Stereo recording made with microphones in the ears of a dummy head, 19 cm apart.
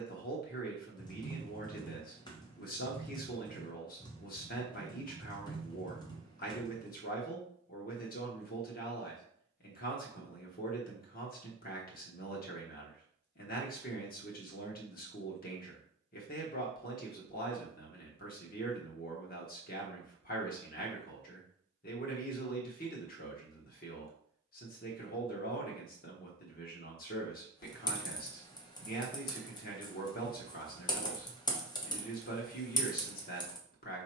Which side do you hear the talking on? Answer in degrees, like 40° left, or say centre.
50° left.